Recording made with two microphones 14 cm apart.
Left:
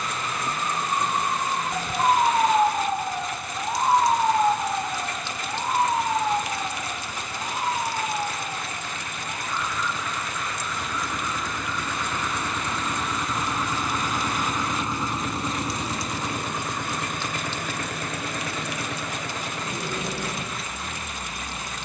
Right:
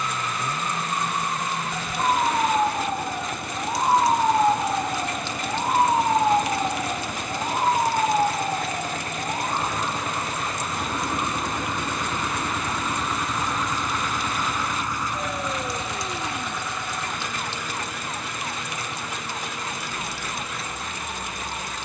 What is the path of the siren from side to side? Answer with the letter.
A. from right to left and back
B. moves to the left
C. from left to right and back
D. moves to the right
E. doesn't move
D.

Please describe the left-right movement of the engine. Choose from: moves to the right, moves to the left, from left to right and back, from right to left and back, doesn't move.
moves to the left.